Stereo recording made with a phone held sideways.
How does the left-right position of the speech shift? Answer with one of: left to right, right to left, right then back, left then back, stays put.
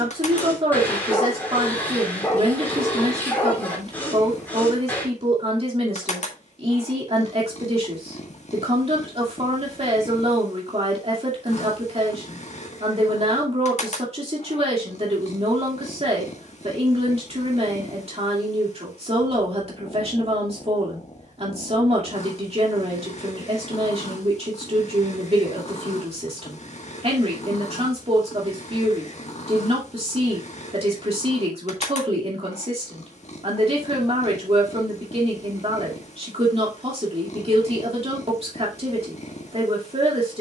stays put.